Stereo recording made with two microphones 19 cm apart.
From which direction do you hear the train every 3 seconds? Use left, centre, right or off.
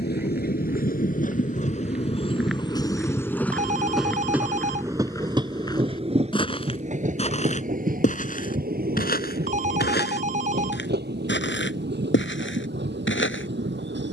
left, centre, right, right, right.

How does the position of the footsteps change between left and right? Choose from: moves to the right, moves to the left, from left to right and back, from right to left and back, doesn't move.
moves to the left.